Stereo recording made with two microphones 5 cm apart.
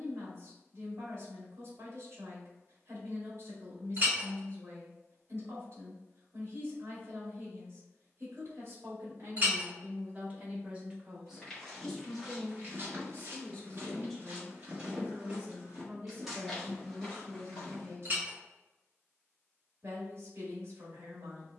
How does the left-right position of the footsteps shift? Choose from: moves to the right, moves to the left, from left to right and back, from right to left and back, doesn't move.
from left to right and back.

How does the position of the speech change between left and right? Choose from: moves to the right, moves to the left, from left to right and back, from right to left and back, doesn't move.
from right to left and back.